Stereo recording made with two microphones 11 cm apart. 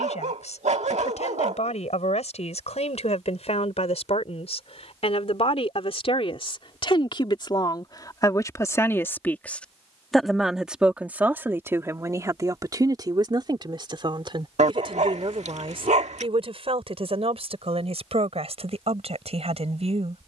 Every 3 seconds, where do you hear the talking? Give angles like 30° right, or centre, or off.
70° left, 60° left, 40° left, 10° right, 40° right, 60° right, 60° right.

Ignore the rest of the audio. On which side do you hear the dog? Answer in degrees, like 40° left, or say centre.
80° right.